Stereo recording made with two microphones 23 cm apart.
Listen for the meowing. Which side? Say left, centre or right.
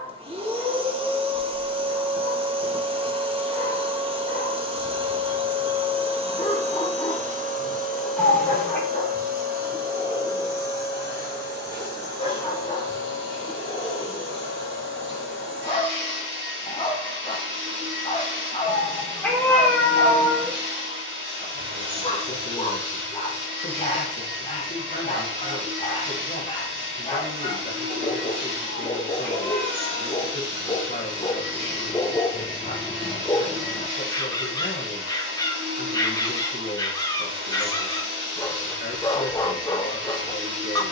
centre.